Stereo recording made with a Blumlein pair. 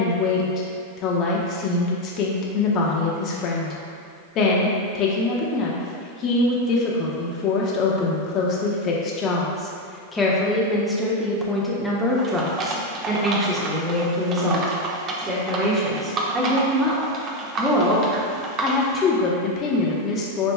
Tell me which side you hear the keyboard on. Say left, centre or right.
right.